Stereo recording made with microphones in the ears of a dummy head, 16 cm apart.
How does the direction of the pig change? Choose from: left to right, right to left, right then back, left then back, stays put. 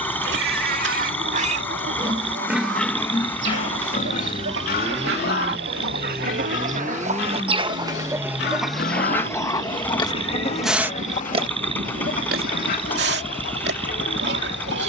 left then back.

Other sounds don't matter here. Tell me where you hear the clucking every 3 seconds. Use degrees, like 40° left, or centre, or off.
70° right, 70° right, 30° right, 30° left, 60° left.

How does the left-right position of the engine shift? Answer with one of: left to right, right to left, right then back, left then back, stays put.
stays put.